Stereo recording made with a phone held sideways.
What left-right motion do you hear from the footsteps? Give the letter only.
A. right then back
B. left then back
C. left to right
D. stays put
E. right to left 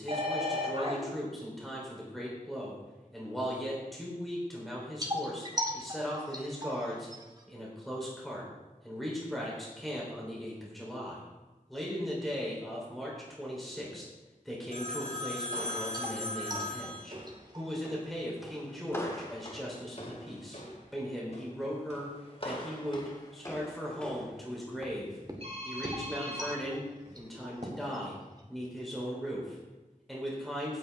B.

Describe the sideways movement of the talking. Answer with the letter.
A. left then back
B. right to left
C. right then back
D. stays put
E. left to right
D.